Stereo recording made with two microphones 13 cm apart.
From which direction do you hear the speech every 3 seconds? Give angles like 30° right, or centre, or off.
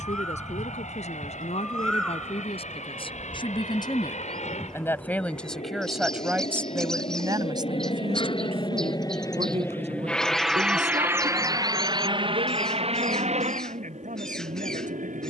50° left, 20° left, 30° right, 60° right, 70° right.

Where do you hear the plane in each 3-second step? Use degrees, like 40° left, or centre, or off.
70° left, 70° left, 50° left, centre, 50° right.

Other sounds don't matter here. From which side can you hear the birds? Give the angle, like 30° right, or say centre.
centre.